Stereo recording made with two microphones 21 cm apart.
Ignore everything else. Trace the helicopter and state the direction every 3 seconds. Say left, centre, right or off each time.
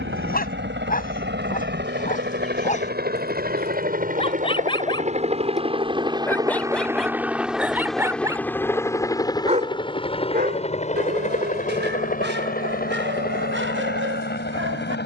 right, right, centre, left, left.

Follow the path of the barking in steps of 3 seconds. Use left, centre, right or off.
left, left, centre, right, right.